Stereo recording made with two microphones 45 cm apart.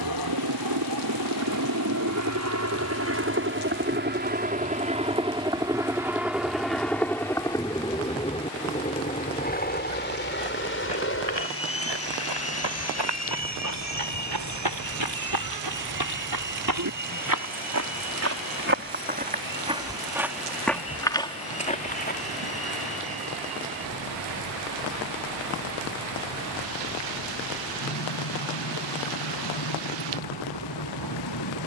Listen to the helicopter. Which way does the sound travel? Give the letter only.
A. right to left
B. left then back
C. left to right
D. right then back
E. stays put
A.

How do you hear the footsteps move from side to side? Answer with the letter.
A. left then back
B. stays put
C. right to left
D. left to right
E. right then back
C.